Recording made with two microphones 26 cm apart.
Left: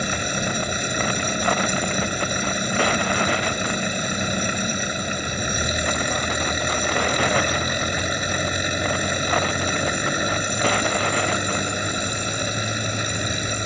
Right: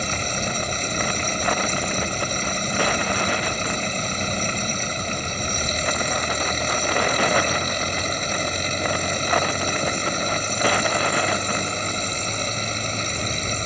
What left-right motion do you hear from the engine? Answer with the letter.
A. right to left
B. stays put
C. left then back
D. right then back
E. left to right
B.